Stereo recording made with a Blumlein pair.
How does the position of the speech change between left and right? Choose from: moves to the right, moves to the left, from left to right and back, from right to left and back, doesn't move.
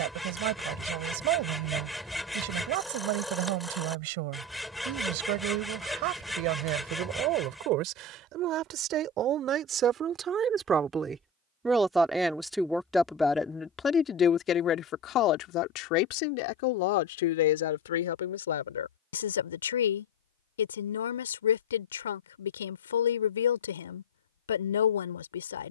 moves to the left.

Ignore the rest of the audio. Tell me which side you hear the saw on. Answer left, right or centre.
centre.